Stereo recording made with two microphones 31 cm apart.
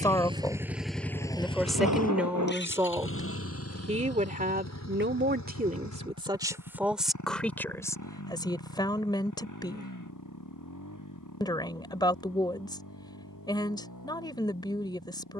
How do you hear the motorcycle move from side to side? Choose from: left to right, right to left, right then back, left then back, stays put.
right to left.